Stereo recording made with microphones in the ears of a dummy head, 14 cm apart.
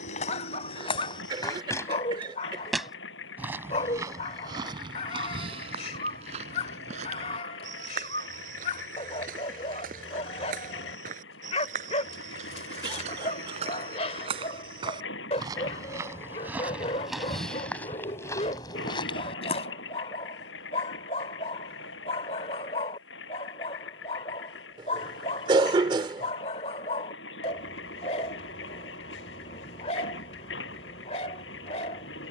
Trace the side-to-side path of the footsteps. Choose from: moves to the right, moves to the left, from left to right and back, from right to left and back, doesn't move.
from left to right and back.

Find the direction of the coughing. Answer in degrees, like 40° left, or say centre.
30° right.